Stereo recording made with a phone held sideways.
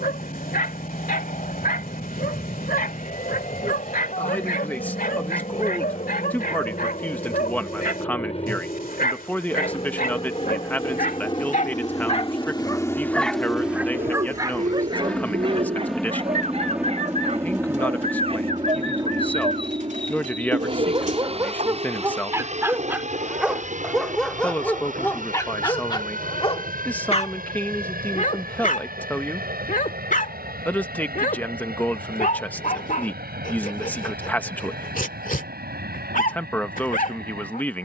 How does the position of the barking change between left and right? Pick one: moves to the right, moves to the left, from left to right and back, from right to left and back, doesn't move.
from left to right and back.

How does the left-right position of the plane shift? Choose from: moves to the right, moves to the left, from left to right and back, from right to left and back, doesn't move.
moves to the right.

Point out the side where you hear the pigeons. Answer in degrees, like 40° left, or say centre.
60° right.